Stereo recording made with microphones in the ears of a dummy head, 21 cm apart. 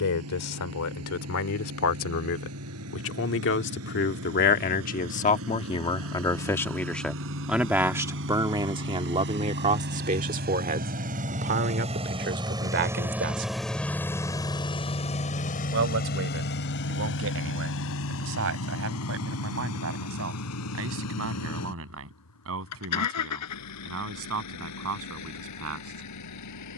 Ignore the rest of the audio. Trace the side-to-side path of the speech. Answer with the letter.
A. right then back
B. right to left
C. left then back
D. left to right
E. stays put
D.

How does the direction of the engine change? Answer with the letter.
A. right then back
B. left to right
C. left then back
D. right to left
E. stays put
D.